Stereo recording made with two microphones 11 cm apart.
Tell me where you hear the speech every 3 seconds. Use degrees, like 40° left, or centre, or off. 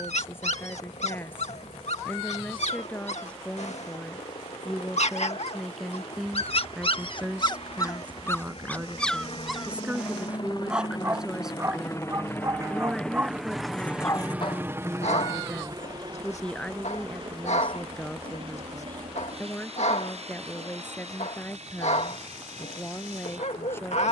20° left, centre, 10° right, 10° right, centre, 10° left, 10° left, 20° left.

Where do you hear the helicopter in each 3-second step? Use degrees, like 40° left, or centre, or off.
80° left, 70° left, 60° left, 40° left, centre, 40° right, 60° right, 70° right.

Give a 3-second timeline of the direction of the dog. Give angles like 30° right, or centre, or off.
80° left, 70° left, 40° left, 10° right, centre, 80° left, 80° left, 80° left.